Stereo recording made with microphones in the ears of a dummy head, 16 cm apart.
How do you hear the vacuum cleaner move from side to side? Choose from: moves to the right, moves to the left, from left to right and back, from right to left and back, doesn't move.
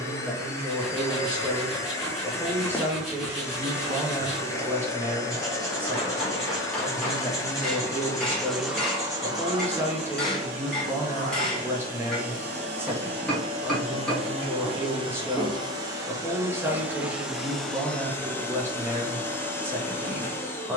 from left to right and back.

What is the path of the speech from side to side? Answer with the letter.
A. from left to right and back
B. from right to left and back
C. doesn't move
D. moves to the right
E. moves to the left
C.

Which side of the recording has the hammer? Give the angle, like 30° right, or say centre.
centre.